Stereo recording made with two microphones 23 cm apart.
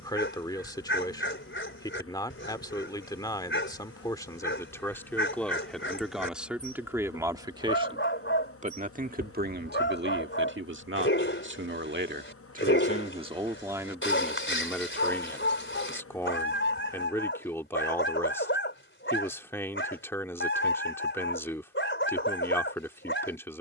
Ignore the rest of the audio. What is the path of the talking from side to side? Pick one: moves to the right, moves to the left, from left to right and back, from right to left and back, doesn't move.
from left to right and back.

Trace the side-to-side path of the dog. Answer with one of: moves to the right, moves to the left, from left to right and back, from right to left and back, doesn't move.
doesn't move.